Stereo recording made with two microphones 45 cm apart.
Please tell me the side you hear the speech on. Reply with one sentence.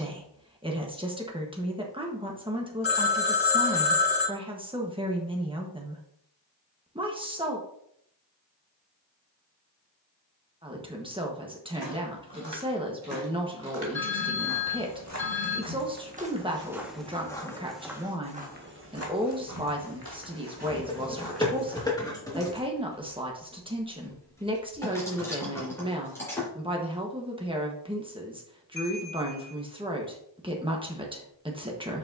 You can hear the speech in the centre.